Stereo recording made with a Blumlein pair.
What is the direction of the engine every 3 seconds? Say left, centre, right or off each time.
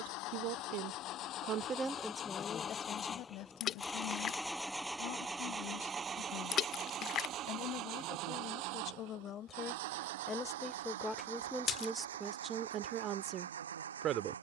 left, centre, right, right, right.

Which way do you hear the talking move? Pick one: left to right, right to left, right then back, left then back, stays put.
left then back.